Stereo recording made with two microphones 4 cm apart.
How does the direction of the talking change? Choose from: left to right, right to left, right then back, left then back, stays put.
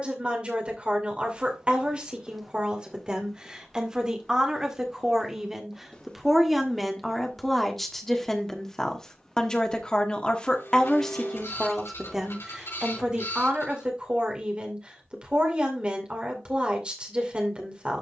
left then back.